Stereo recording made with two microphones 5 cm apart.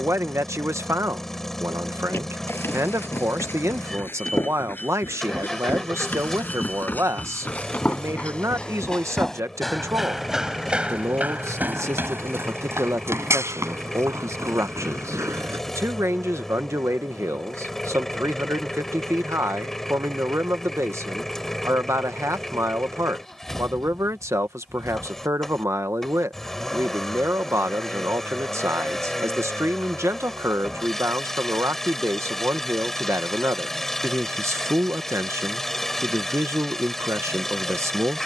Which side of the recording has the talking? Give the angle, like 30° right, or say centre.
80° right.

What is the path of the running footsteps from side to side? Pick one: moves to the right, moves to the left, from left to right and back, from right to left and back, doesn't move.
moves to the right.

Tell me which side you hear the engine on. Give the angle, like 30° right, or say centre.
10° left.